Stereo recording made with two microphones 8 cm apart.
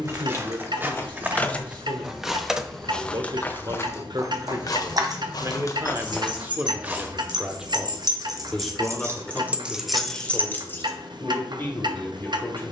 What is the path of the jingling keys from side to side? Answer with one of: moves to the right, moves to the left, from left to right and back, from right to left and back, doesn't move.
from left to right and back.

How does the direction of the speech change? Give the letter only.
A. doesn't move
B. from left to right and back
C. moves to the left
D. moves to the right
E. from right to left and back
C.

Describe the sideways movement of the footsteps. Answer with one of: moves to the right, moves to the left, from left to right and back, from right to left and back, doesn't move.
from right to left and back.